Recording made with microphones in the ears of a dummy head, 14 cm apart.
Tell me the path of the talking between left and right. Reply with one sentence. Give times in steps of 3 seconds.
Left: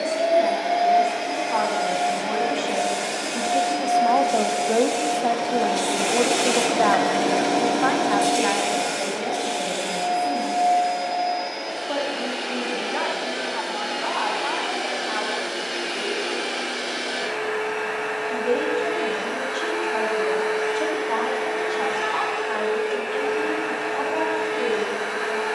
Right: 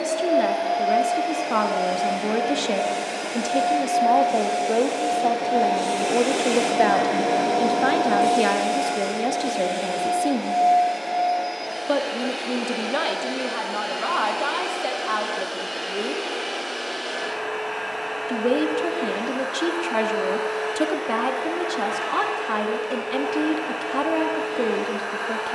You can hear the talking on the right from 0 s, in the centre from 3 s and on the right from 6 s.